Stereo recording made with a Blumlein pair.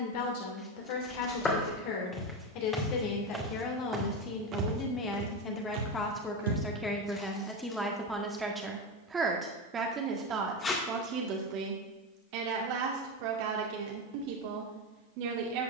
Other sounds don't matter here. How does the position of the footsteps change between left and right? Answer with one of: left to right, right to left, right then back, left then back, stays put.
left to right.